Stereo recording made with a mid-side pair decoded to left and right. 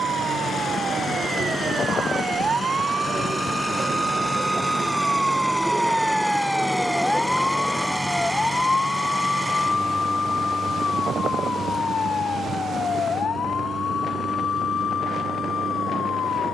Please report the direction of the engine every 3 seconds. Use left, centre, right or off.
left, left, centre, right, right, right.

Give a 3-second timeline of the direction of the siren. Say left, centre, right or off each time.
right, right, centre, left, left, left.